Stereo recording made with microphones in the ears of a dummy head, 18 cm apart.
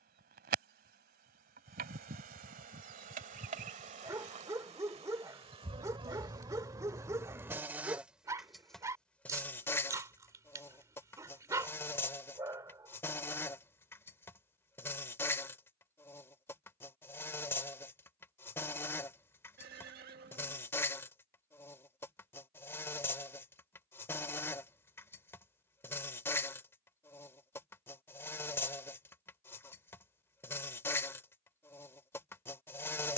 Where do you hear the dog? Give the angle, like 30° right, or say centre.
20° right.